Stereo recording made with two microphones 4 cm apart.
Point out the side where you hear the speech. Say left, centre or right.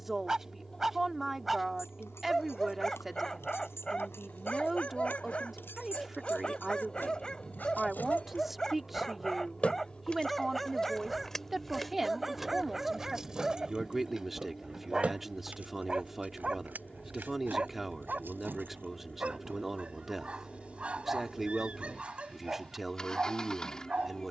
centre.